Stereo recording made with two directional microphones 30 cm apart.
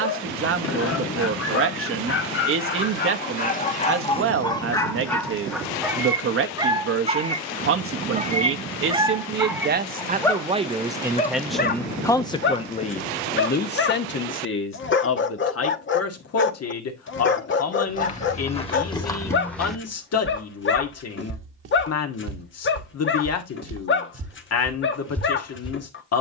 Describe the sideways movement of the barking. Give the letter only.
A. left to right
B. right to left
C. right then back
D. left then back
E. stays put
C.